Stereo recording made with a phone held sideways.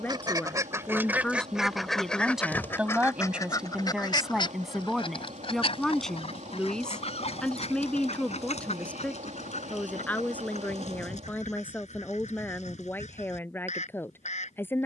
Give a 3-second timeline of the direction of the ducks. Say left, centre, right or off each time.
centre, left, left, left, left.